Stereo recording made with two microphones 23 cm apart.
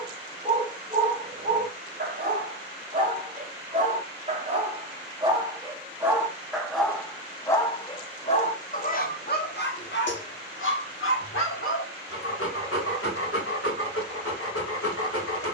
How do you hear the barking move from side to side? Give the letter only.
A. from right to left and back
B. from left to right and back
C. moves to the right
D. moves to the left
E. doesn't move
D.